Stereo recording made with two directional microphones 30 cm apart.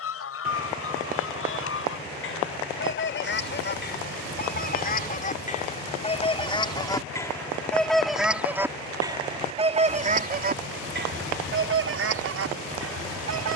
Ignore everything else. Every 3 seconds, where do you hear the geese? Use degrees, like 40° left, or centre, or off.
50° left, 30° left, 10° left, 30° right, 50° right.